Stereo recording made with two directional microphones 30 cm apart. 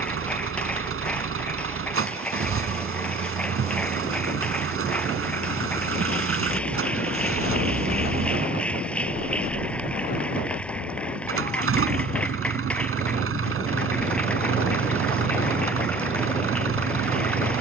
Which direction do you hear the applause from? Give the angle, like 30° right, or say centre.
centre.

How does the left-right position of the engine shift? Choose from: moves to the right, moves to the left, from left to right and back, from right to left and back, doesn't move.
doesn't move.